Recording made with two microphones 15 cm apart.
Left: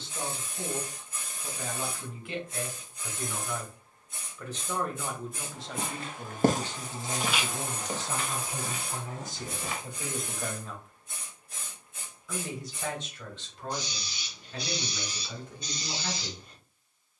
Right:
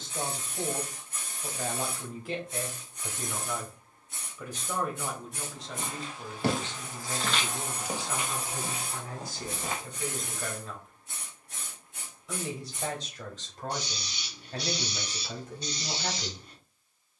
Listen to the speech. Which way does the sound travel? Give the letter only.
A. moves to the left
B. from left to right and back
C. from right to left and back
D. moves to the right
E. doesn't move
C.